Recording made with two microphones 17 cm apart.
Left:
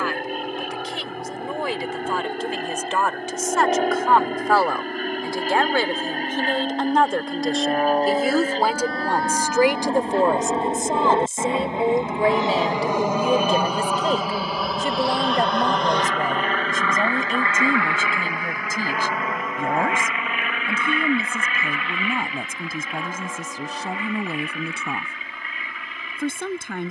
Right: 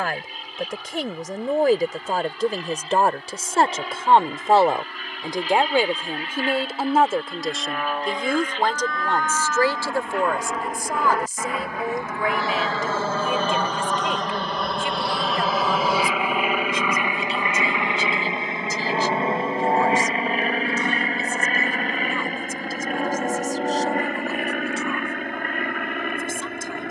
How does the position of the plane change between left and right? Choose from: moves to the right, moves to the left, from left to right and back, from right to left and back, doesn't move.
moves to the right.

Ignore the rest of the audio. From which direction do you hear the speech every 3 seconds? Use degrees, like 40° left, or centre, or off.
50° right, 30° right, centre, 20° left, 40° left, 50° left, 50° left, 60° left, 60° left.